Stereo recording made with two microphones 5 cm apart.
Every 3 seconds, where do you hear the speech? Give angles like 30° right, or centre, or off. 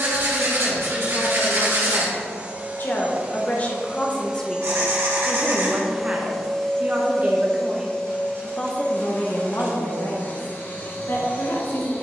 60° left, 10° left, 10° right, 60° left.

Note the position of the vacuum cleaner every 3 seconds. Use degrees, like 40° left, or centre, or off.
40° right, 20° right, 20° left, 40° left.